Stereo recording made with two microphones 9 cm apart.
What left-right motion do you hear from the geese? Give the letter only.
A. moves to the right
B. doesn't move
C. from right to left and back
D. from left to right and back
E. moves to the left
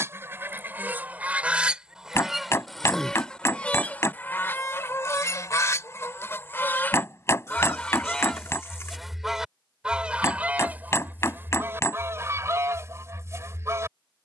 C.